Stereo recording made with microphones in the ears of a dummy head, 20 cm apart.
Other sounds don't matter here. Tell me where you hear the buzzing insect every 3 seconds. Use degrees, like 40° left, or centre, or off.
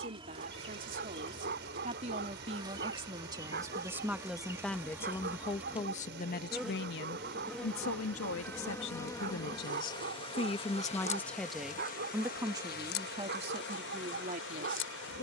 20° right, 10° right, centre, 30° left, 50° left.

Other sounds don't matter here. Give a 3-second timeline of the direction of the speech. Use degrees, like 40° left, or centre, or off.
30° right, centre, 60° left, 30° left, 30° right.